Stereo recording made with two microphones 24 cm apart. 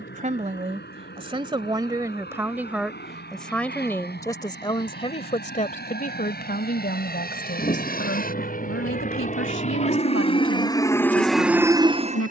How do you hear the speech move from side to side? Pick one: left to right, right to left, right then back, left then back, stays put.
right to left.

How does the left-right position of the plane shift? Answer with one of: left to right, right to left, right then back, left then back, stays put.
left to right.